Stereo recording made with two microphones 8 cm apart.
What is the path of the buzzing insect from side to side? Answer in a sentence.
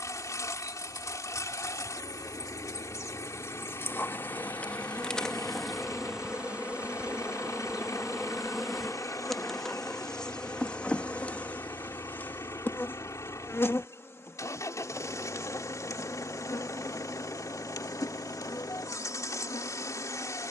In this clip you hear the buzzing insect go right and come back.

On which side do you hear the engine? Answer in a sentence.
You can hear the engine on the left.